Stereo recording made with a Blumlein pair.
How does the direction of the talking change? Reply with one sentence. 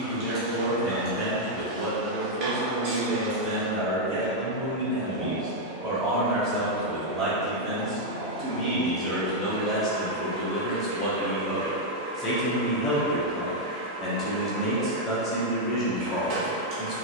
You can hear the talking move to the left.